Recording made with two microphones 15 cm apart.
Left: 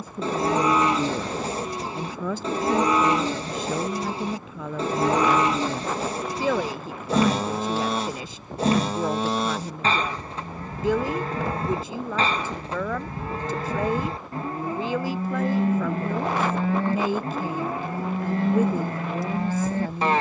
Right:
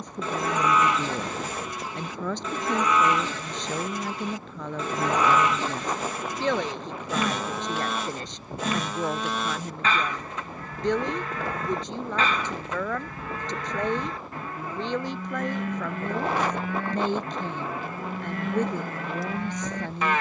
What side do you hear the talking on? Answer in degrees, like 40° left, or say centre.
10° left.